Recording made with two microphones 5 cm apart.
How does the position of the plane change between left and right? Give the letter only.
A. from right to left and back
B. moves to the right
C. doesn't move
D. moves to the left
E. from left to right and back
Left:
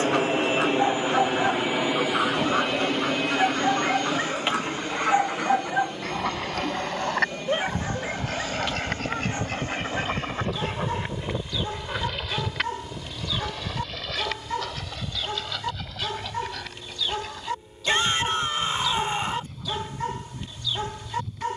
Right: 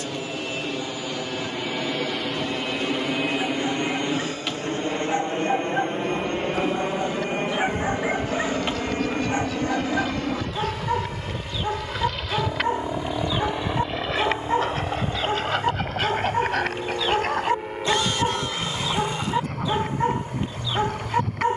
B.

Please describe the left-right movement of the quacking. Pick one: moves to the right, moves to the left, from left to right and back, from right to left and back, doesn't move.
moves to the right.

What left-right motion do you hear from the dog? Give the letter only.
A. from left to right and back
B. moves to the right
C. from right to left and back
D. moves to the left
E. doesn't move
B.